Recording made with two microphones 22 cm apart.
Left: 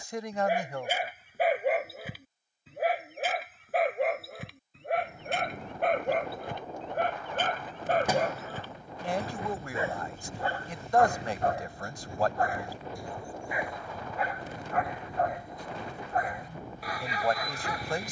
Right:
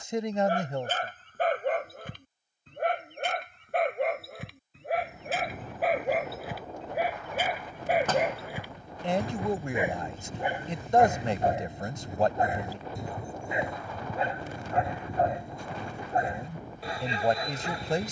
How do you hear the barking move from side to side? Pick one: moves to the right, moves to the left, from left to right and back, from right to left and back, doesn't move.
moves to the right.